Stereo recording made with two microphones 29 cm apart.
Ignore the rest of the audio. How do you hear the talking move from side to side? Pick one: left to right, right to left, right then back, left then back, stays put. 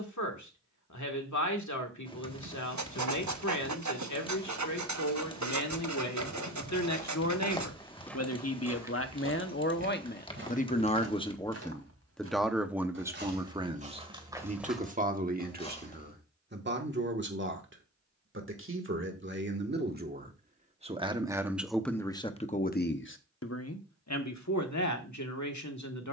right then back.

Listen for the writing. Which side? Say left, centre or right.
right.